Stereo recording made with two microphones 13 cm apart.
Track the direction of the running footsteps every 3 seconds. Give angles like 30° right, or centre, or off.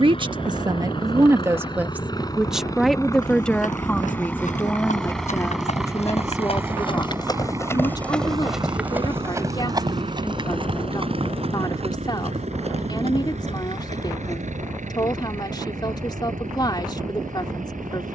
off, 70° left, 20° left, 40° right, 60° right, off.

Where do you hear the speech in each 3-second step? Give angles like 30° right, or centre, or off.
20° right, 10° left, 30° left, 30° left, 30° left, 30° left.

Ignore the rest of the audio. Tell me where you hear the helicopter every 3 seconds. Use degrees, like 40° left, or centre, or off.
40° left, 10° left, 20° right, 50° right, 60° right, 70° right.